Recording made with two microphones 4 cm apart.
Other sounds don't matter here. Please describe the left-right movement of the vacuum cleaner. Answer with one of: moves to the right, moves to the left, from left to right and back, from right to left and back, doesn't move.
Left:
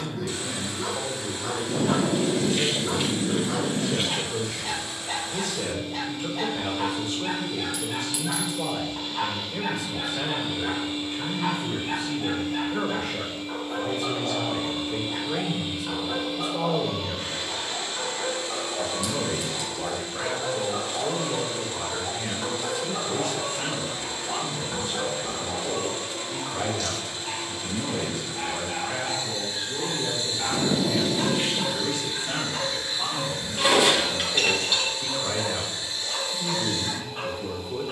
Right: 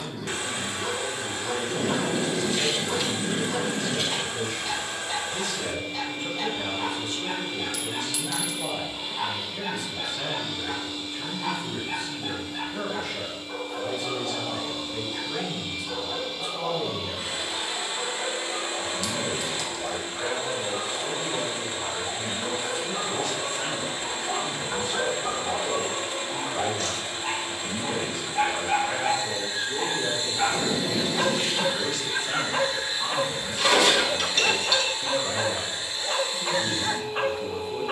from right to left and back.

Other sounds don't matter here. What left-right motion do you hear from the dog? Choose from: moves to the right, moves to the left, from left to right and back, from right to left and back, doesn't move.
moves to the right.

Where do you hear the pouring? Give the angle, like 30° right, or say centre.
30° left.